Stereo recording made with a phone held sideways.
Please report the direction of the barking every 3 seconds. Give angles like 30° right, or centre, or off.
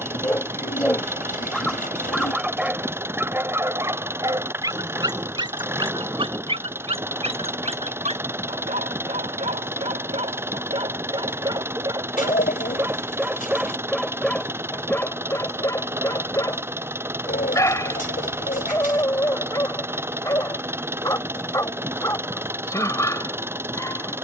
centre, 20° right, 40° right, 30° right, 10° right, 20° left, 20° left, 20° left.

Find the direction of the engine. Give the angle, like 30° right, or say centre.
10° right.